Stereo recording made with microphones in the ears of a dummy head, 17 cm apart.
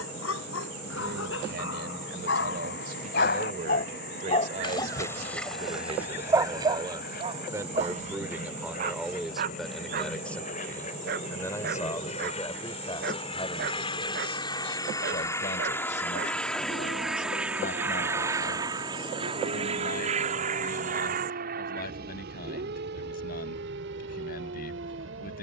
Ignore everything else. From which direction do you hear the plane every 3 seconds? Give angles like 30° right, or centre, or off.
60° left, 60° left, 50° left, 40° left, 30° left, centre, 30° right, 50° right, 60° right.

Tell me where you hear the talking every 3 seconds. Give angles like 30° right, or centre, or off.
50° right, 40° right, 20° right, 10° left, 20° left, 40° left, 50° left, 50° left, 50° left.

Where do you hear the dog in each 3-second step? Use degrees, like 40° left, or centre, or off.
70° left, 20° left, 30° right, 50° right, 50° right, 50° right, 50° right, 50° right, 50° right.